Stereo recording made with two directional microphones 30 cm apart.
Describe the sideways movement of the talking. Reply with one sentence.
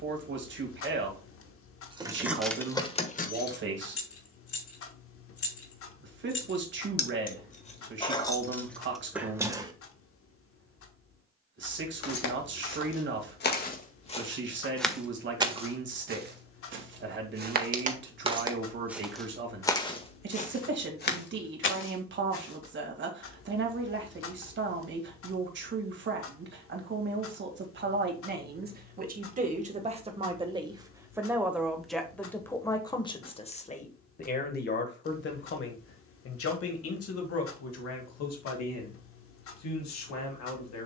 You can hear the talking go from the right side to the left.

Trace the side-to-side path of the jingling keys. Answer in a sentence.
You can hear the jingling keys move from right to left and back again.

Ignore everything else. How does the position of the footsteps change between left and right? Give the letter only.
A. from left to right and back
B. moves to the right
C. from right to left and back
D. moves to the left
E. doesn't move
A.